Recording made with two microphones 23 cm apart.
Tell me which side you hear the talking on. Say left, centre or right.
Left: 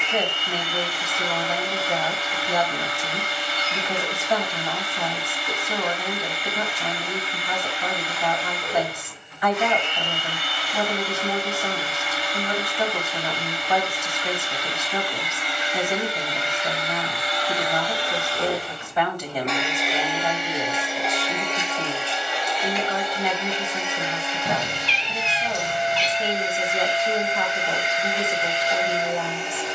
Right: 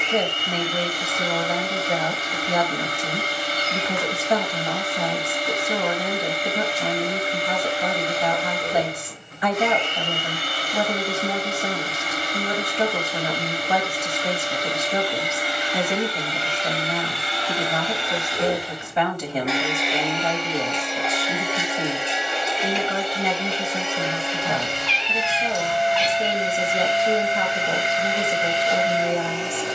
right.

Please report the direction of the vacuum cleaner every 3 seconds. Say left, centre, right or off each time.
right, right, right, right, right, right, centre, right, right, right.